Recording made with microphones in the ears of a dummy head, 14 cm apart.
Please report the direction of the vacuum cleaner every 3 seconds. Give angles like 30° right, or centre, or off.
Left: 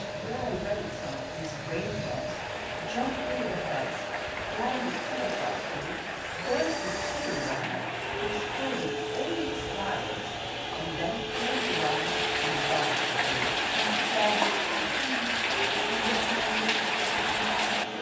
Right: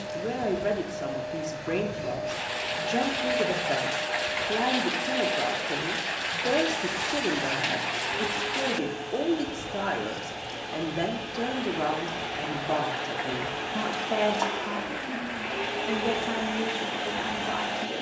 50° left, 50° left, 50° left, 40° left, 20° left, 20° right.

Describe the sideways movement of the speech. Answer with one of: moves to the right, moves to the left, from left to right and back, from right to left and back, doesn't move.
doesn't move.